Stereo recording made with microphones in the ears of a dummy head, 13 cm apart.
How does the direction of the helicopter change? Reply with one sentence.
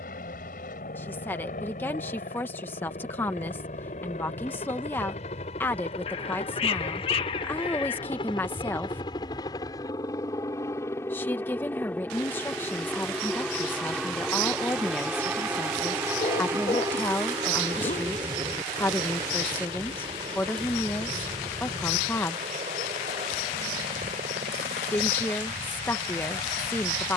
In this clip you hear the helicopter go from the left side to the right.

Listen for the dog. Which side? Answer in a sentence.
In this clip you hear the dog on the left.